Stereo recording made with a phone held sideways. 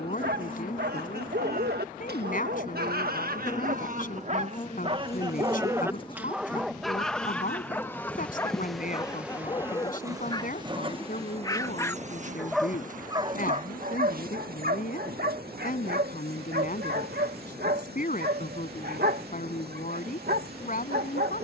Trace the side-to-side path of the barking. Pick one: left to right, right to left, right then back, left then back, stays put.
left then back.